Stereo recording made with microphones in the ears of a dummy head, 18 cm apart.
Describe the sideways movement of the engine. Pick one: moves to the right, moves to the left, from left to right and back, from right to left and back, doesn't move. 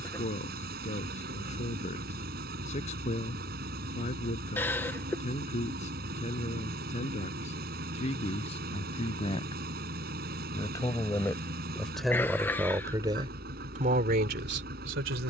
doesn't move.